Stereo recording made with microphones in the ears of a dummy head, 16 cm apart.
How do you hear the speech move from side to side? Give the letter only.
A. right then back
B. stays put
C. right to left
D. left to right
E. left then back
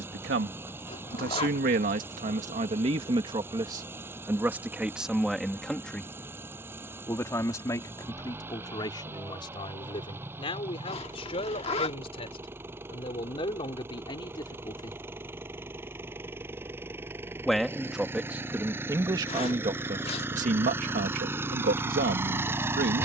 E.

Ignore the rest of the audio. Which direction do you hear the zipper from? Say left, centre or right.
left.